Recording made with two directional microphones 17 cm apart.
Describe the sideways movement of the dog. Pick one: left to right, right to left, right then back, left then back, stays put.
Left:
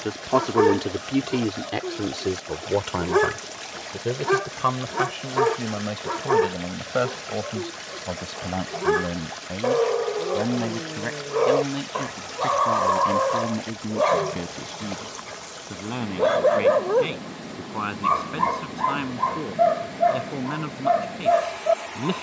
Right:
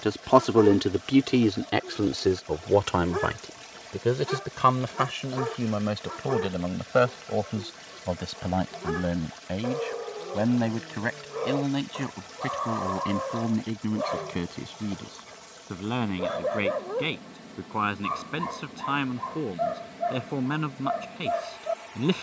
stays put.